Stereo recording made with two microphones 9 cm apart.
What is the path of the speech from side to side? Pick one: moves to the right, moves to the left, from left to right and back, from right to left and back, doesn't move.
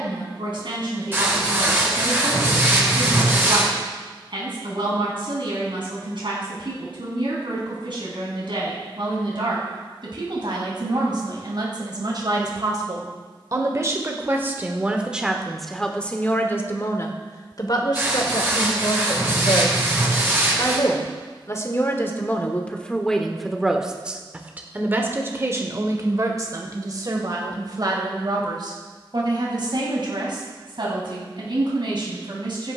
from right to left and back.